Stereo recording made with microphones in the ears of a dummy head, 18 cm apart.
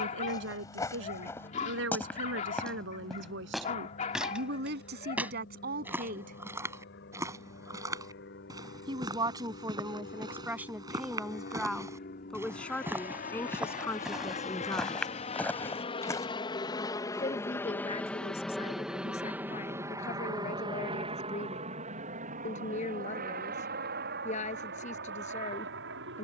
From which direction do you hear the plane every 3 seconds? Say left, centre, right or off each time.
left, left, left, left, left, left, centre, right, right.